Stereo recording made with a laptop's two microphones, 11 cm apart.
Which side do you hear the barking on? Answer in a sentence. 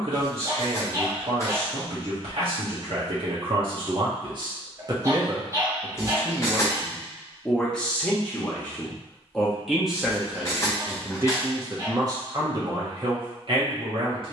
In this clip you hear the barking on the right.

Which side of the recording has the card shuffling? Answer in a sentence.
You can hear the card shuffling on the left.